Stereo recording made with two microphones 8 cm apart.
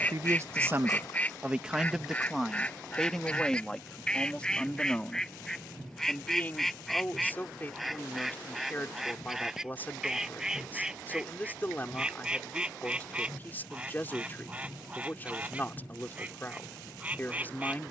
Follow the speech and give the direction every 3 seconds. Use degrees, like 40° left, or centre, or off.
20° right, 10° left, 20° left, 20° left, 20° left, 20° left.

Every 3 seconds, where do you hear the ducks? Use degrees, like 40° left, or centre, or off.
20° left, 10° left, centre, 10° right, 10° right, 20° right.